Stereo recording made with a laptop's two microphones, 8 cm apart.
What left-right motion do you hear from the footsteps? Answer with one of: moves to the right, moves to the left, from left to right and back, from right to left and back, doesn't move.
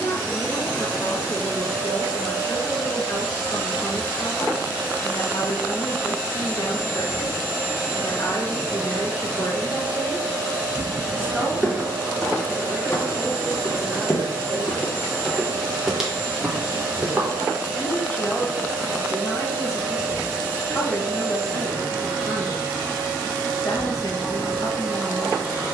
from right to left and back.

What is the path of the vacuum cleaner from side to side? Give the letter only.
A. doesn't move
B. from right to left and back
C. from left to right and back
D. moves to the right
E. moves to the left
A.